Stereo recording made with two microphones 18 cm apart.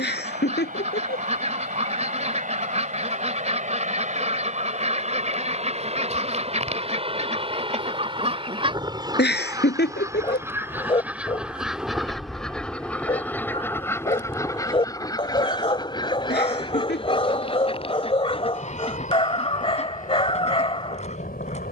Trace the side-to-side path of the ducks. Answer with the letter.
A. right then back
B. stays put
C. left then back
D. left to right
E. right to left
E.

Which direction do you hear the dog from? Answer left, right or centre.
left.